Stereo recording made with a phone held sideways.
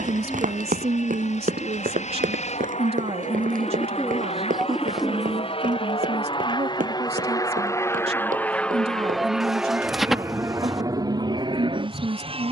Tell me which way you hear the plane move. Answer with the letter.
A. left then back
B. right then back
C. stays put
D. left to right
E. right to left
D.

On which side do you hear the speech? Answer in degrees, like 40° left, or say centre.
50° right.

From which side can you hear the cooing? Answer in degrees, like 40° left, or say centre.
centre.